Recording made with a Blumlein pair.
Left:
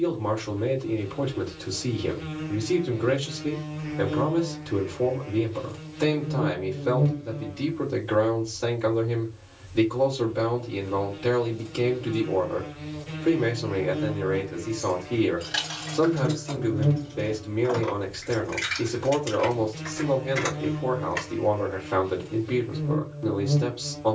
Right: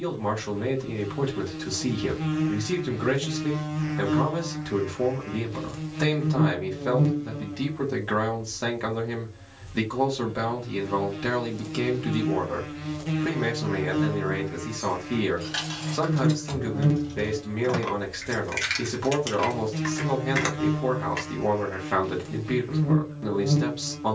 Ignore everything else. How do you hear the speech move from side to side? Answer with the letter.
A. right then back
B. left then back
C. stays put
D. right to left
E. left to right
C.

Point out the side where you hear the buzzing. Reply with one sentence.
You can hear the buzzing on the right.